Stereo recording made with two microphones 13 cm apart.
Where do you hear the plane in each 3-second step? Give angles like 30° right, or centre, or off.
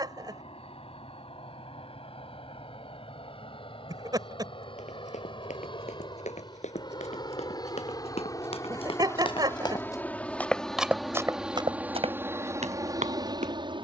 50° left, 50° left, 30° left, 10° left, 30° right.